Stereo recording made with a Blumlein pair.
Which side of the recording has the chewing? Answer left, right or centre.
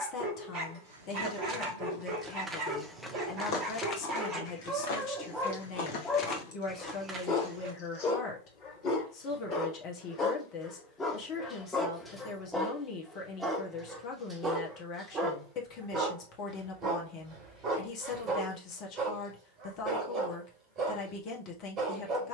left.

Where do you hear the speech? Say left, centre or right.
left.